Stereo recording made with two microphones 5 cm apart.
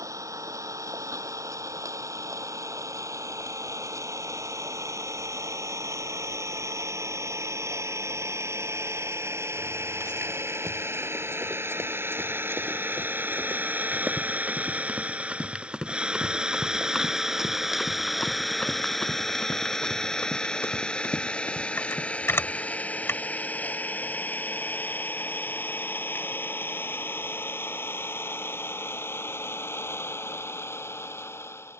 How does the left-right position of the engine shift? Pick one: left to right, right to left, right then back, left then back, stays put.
right to left.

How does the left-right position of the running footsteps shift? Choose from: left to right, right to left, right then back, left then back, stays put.
right to left.